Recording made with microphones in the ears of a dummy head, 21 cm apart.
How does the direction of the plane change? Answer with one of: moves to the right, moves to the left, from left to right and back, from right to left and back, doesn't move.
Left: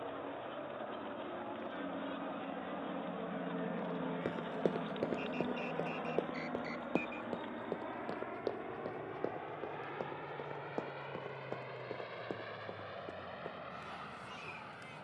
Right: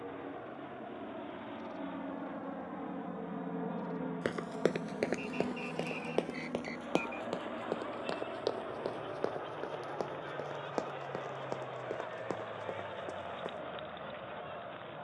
moves to the left.